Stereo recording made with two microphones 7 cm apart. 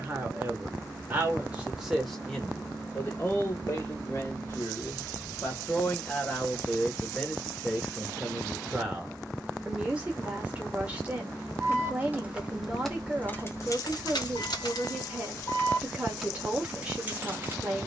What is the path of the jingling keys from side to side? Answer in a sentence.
You can hear the jingling keys move from right to left and back again.